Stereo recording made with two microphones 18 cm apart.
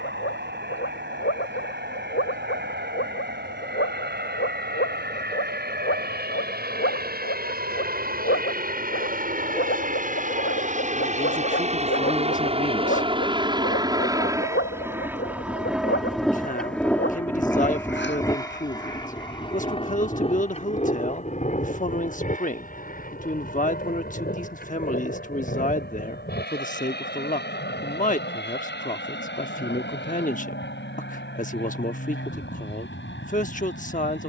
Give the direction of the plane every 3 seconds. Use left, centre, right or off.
right, right, right, right, right, centre, left, left, left, left, left, left.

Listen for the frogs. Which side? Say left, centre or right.
left.